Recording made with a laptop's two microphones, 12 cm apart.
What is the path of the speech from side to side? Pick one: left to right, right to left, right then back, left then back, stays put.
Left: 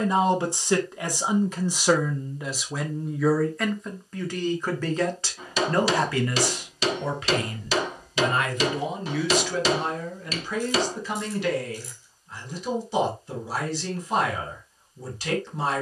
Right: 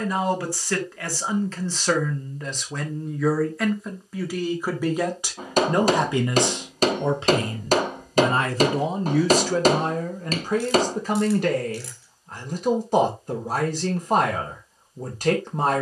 left to right.